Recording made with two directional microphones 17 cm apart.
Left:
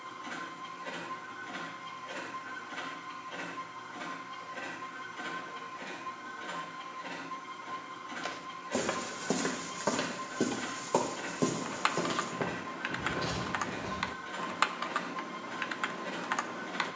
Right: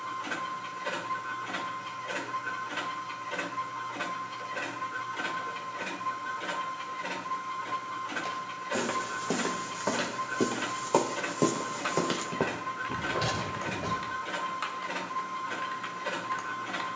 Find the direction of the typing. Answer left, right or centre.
left.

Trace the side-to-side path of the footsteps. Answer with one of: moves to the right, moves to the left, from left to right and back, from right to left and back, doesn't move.
moves to the right.